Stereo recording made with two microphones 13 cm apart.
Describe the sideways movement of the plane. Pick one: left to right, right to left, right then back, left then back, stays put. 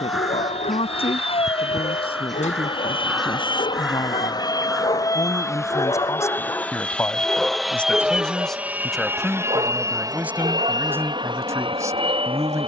left to right.